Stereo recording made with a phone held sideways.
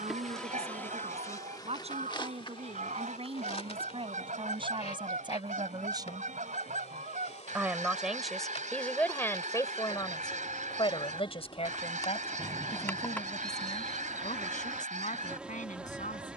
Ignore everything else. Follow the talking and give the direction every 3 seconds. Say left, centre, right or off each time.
right, right, centre, left, left, left.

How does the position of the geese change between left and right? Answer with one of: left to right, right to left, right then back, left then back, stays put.
stays put.